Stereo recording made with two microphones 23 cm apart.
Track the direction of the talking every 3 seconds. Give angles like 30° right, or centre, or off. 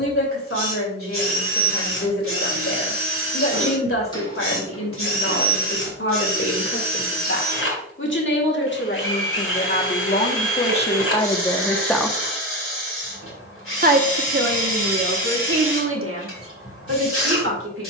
60° left, 60° left, 60° left, 30° left, 40° right, 70° right.